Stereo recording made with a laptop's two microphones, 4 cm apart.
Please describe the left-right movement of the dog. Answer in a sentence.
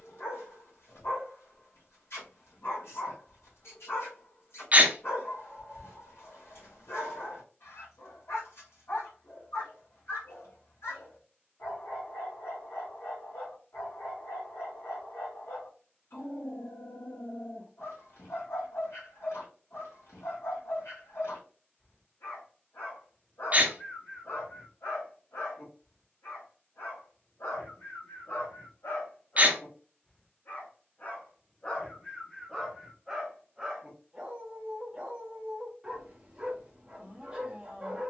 You can hear the dog move to the right.